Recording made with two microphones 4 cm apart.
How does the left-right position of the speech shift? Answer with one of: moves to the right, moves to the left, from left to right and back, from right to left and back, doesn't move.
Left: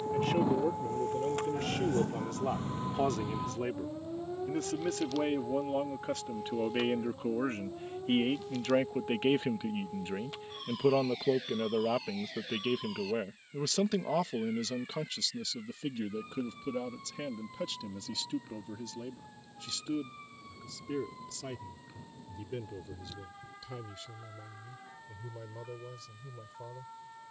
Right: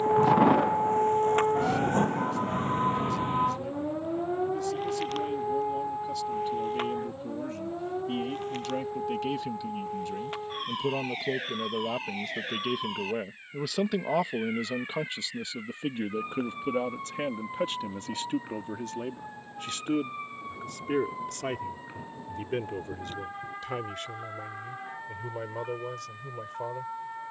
moves to the right.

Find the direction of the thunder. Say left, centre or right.
right.